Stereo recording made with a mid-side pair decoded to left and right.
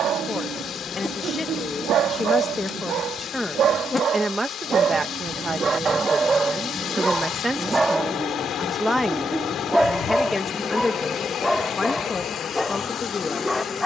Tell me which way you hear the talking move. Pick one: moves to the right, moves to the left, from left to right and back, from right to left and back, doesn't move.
from left to right and back.